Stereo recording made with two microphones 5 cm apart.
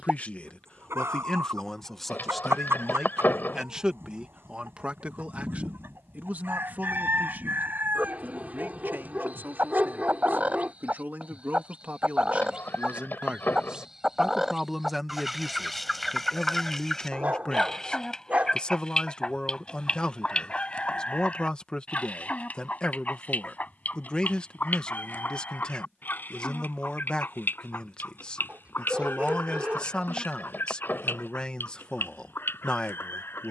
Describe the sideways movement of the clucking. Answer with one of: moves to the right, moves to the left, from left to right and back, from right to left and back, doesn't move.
moves to the left.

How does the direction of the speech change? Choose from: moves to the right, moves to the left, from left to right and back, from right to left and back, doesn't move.
from left to right and back.